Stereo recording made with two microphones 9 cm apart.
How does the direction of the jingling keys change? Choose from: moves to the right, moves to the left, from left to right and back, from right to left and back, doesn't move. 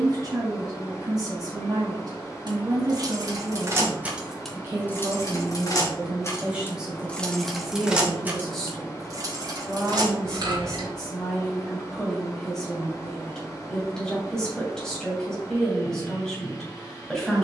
from right to left and back.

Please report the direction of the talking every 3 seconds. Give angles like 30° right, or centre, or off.
40° right, 30° right, centre, 10° left, 10° left, 10° left.